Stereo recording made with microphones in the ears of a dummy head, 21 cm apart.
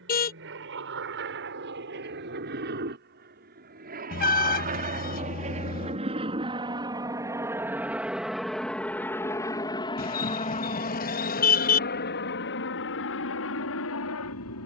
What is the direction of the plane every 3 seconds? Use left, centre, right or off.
right, right, centre, left, left.